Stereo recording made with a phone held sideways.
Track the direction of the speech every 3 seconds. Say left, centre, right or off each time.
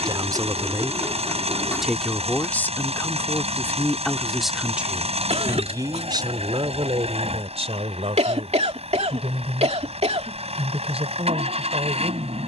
centre, centre, right, right.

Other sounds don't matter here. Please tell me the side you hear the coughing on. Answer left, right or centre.
right.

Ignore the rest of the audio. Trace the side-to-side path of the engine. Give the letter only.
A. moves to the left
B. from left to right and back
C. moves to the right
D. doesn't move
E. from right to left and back
D.